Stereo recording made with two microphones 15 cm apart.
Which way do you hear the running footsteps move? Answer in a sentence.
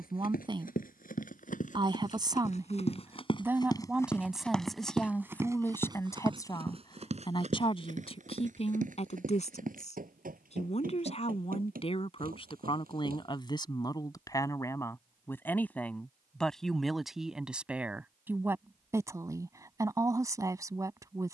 In this clip you hear the running footsteps move to the right.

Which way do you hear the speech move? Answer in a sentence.
You can hear the speech move from right to left and back again.